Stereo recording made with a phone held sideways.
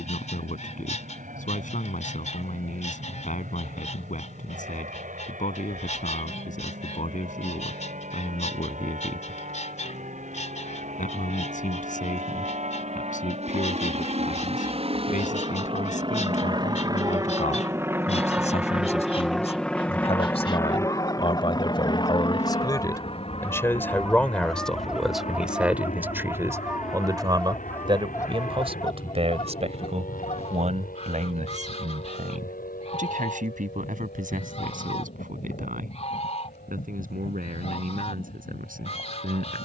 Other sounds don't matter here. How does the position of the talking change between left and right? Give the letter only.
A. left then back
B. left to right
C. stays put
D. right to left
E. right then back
B.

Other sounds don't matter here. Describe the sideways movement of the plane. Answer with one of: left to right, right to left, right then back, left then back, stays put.
right to left.